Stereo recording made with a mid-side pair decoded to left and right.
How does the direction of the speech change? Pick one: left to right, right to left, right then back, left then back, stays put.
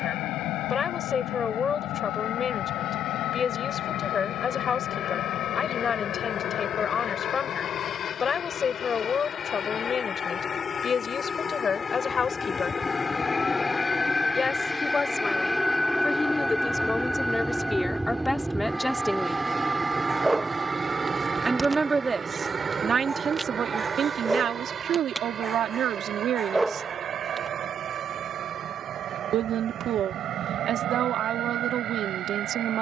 left to right.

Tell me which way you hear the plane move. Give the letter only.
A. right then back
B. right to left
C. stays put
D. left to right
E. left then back
D.